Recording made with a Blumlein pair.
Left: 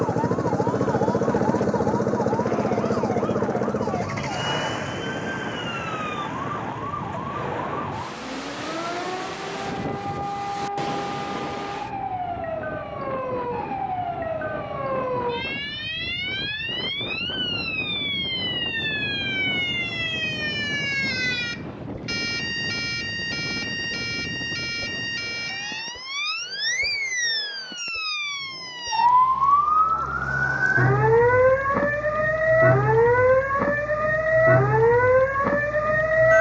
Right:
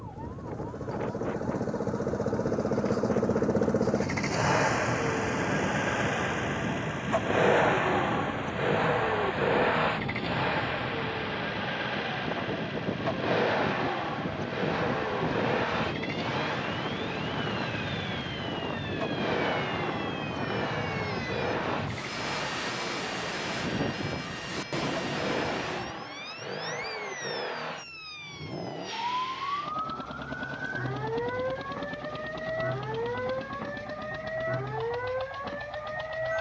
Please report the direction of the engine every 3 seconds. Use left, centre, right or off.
left, centre, right, right, right, right, right, right, right, right, right, right.